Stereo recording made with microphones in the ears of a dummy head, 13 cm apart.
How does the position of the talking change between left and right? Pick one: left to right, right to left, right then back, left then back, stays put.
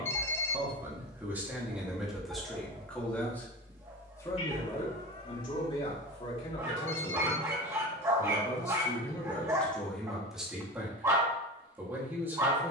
left then back.